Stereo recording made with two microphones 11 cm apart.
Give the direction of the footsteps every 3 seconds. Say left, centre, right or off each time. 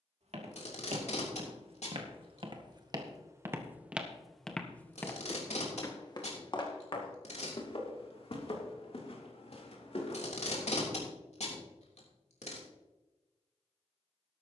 right, centre, left, left, off.